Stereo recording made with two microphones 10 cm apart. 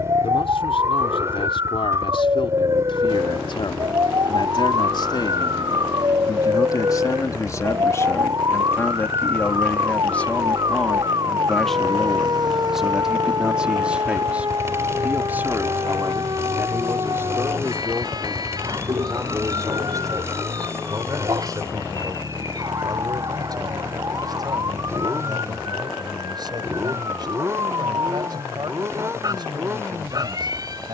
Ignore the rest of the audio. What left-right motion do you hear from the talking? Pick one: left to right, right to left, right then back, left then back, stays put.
left to right.